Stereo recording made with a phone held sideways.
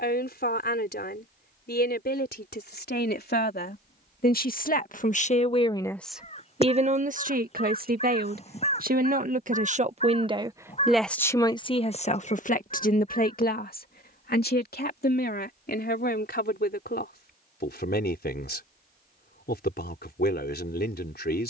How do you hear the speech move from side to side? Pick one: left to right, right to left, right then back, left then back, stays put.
right then back.